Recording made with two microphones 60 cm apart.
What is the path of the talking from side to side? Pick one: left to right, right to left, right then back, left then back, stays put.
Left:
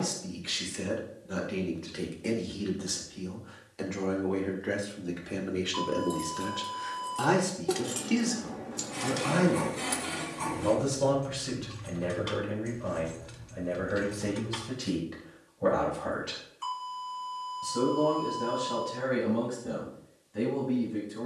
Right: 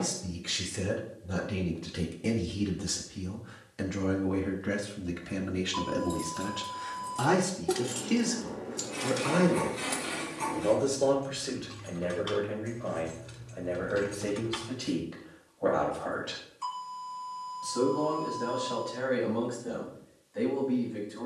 right to left.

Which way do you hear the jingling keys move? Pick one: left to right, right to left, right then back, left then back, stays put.
left then back.